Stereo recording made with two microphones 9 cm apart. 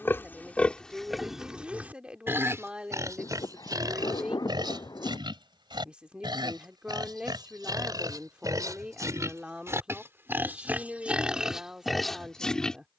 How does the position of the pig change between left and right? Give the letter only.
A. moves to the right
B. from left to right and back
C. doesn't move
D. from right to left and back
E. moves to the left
B.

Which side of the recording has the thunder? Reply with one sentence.
In this clip you hear the thunder on the left.